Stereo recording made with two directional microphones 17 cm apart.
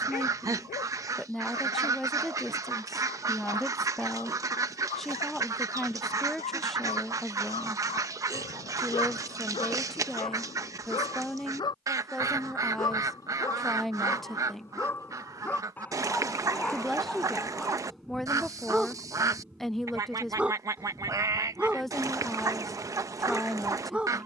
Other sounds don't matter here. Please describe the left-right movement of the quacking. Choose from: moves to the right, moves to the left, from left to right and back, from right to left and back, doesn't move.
doesn't move.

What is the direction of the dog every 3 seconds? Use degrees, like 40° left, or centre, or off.
50° left, 40° left, 40° left, 30° left, 20° left, 10° left, centre, 10° right.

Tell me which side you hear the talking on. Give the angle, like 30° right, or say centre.
centre.